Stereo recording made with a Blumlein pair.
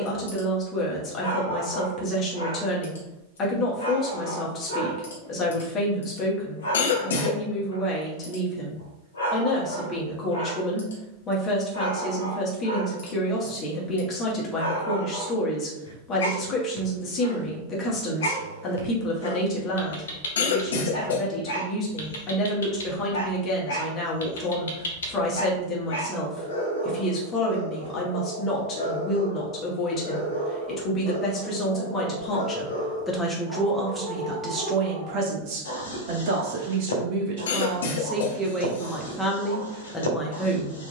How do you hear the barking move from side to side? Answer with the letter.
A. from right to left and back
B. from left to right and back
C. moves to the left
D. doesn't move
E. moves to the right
D.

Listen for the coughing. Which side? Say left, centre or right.
left.